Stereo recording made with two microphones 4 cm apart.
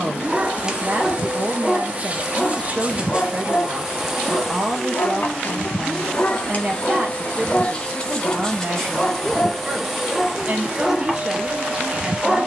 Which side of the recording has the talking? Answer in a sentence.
In this clip you hear the talking on the right.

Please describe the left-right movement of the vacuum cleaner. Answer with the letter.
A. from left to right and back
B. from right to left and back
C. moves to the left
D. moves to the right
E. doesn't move
B.